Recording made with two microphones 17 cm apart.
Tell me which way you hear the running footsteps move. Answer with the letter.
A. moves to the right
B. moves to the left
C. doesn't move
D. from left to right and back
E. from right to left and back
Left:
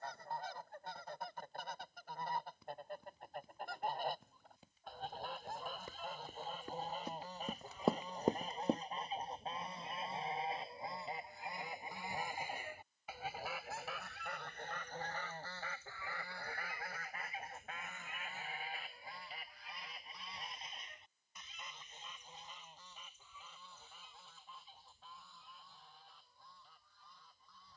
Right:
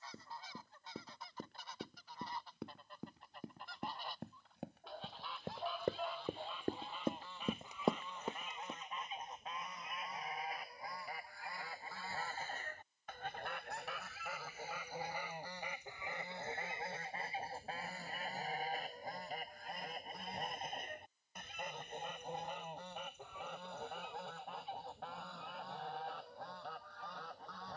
B.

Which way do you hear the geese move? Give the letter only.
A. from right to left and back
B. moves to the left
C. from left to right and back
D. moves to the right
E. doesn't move
D.